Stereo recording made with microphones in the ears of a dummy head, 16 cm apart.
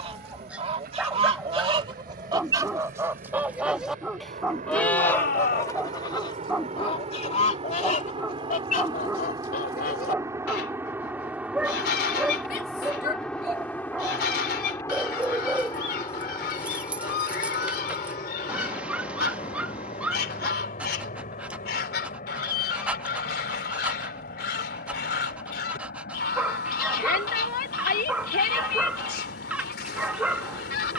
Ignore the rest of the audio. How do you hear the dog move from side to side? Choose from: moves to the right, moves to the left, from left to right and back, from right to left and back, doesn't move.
doesn't move.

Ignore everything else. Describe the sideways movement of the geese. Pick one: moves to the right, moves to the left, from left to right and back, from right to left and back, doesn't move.
moves to the left.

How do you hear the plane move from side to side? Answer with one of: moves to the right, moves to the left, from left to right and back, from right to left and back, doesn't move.
moves to the left.